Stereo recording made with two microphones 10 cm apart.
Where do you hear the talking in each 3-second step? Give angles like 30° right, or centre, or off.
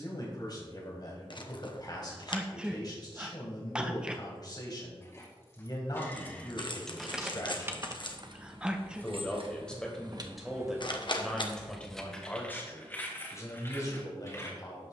40° left, 40° left, 40° left, 10° left, 30° left.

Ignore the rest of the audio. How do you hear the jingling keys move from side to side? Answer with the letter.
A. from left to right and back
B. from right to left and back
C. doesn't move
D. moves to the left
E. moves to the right
A.